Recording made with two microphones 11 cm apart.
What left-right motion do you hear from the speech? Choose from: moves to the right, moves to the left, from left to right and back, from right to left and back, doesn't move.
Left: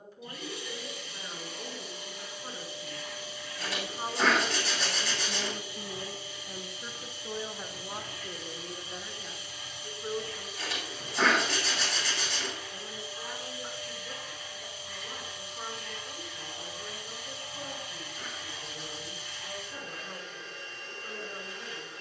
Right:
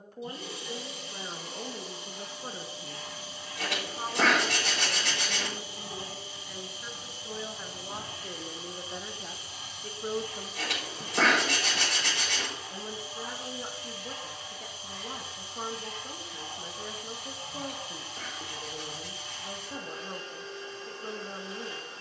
from right to left and back.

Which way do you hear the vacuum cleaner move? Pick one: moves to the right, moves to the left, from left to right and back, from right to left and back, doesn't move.
doesn't move.